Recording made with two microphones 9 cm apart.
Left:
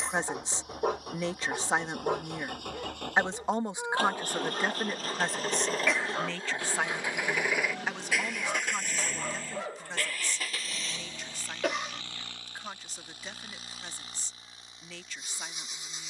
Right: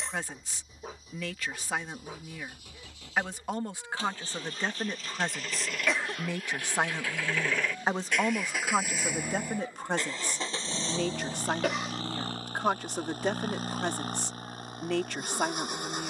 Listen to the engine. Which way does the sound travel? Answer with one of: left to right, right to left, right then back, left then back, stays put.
left to right.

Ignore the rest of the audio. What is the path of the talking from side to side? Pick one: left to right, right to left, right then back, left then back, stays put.
left to right.